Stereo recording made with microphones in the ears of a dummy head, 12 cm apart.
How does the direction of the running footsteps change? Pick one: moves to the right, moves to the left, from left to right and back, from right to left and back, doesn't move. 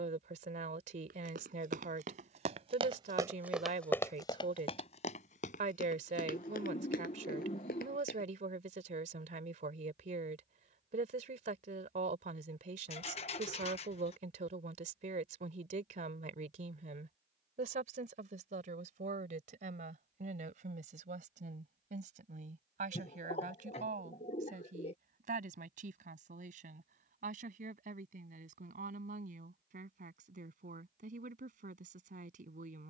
moves to the left.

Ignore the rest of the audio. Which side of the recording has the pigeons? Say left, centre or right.
left.